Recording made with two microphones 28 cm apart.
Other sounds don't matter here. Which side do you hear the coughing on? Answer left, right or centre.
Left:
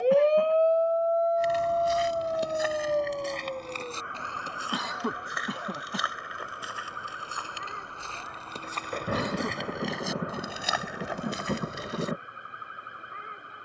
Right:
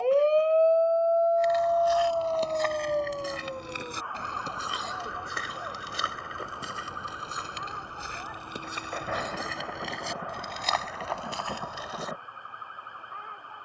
left.